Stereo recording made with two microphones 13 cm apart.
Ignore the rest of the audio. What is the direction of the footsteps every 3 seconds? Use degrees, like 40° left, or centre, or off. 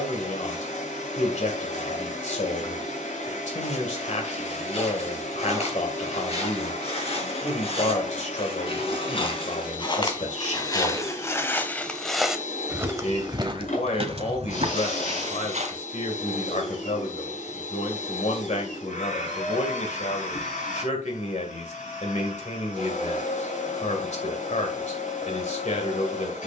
off, 60° left, 50° left, 30° left, 40° right, 70° right, off, off, off.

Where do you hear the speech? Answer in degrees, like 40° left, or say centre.
70° left.